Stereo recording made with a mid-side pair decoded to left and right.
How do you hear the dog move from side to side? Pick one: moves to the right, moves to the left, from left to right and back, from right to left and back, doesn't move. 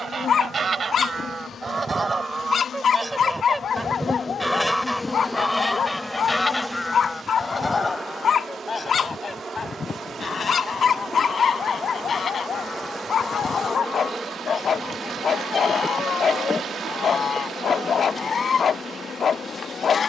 doesn't move.